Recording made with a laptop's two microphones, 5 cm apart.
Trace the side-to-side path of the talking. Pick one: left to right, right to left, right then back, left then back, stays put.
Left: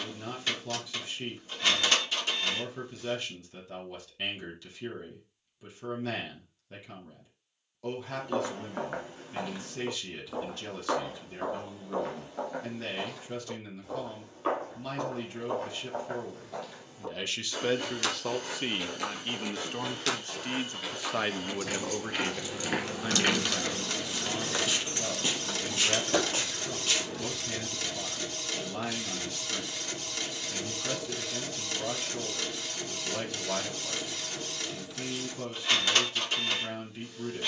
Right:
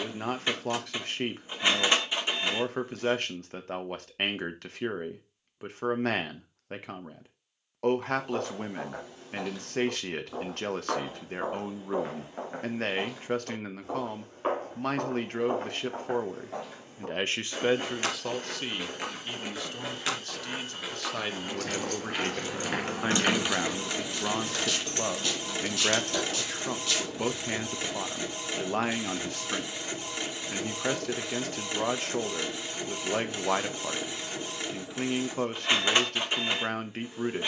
left then back.